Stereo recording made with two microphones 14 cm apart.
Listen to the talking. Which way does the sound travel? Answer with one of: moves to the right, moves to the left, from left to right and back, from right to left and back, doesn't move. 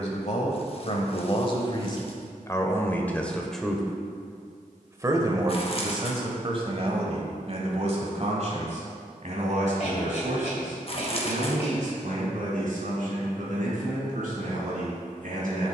moves to the right.